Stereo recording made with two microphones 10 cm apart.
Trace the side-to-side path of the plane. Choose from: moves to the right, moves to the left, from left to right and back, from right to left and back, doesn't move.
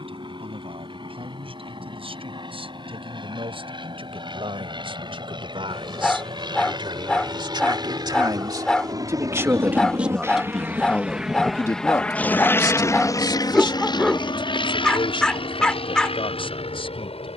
moves to the left.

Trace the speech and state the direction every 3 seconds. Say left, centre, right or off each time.
right, right, right, centre, left, left.